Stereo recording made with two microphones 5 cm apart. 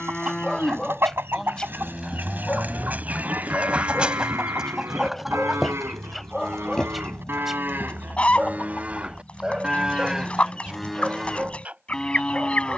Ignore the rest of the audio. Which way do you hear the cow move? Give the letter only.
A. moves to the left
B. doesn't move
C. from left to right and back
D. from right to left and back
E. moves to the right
C.